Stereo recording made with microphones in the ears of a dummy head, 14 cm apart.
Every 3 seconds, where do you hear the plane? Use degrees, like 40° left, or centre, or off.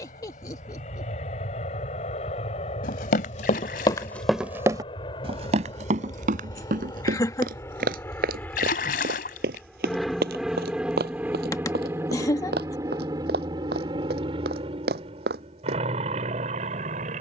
50° left, 40° left, 20° left, centre, 30° right, 40° right.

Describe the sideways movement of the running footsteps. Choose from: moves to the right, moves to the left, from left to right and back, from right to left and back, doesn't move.
moves to the right.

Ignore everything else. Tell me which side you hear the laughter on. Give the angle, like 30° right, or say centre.
20° left.